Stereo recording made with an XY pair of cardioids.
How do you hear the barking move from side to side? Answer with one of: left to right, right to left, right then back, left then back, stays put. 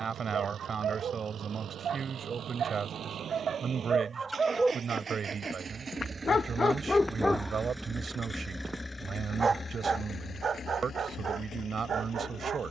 left then back.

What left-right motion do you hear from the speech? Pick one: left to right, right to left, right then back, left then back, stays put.
stays put.